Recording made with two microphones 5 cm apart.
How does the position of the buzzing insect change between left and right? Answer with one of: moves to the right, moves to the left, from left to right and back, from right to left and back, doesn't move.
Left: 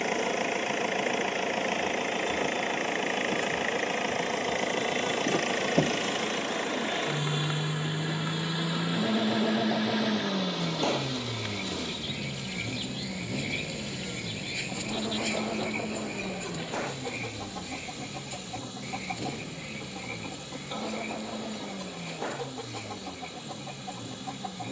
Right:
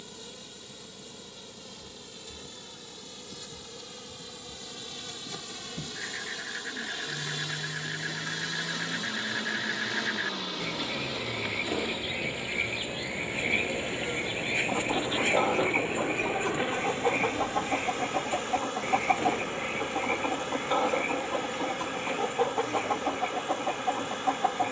moves to the right.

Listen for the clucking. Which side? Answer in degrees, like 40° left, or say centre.
50° right.